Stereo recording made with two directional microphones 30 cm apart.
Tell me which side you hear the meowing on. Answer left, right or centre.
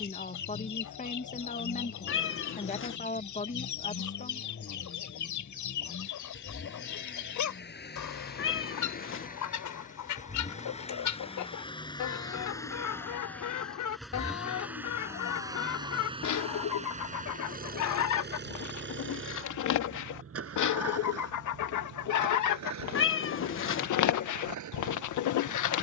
left.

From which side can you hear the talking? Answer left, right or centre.
left.